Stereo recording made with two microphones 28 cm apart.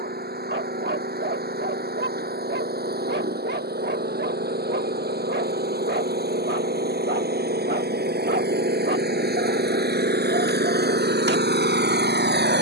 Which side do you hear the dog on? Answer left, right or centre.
right.